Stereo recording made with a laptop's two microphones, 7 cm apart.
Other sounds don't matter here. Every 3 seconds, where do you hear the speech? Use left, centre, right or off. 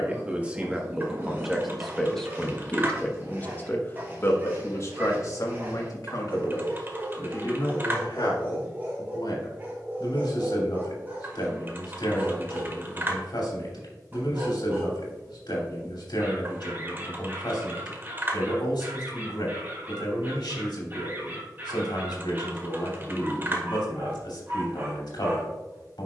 centre, left, left, left, left, left, left, left, left.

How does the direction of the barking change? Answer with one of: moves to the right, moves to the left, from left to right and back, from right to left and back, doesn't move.
doesn't move.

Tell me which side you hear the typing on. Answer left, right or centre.
right.